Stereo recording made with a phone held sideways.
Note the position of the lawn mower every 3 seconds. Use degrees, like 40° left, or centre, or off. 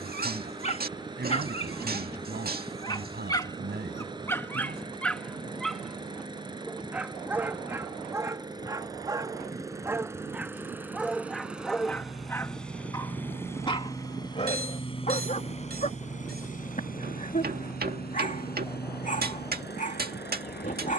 30° right, 30° right, 30° right, 10° right, 20° left, 50° left, 80° left.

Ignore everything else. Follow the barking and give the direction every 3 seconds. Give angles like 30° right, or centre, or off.
40° left, 10° left, 10° right, 10° right, 30° left, 50° left, 50° left.